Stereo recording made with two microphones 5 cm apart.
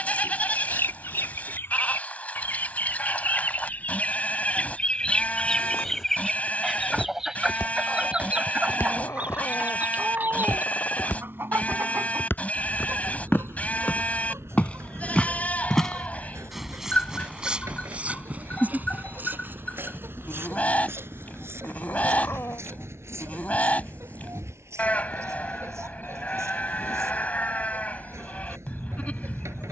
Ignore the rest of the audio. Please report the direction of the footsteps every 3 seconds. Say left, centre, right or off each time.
off, left, left, left, left, centre, right, right, right, off.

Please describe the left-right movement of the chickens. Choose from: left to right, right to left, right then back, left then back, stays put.
left to right.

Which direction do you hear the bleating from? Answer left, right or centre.
left.